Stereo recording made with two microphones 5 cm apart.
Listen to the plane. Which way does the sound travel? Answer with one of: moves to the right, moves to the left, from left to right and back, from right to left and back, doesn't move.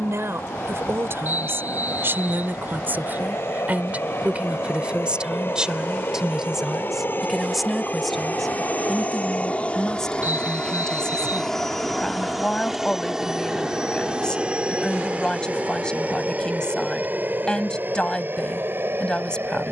moves to the right.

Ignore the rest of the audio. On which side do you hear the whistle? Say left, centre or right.
right.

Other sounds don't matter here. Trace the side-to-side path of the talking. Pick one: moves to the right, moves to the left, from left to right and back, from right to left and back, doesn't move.
moves to the left.